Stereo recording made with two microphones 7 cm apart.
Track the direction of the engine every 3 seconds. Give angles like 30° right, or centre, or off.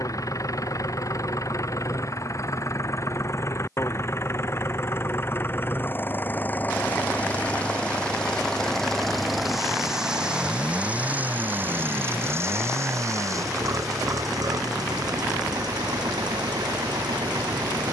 40° left, 30° left, 20° left, 10° right, 50° right, 70° right.